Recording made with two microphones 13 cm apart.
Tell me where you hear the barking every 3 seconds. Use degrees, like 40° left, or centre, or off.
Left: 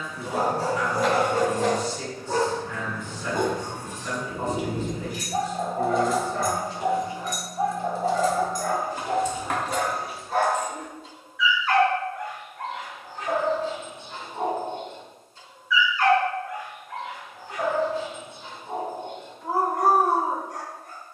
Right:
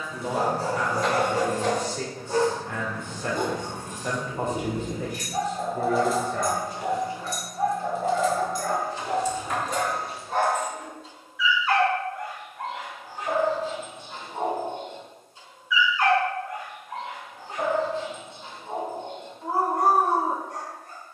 60° left, 40° left, 20° left, centre, 10° right, 20° right, 30° right.